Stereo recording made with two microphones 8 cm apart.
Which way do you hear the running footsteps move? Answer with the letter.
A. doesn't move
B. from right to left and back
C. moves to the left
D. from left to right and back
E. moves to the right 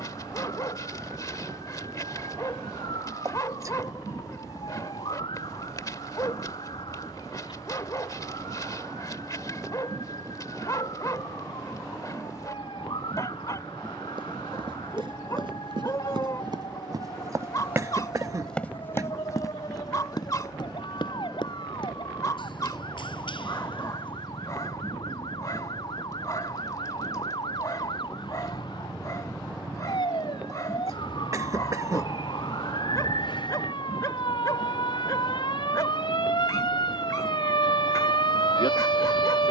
C.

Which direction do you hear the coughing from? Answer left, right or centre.
right.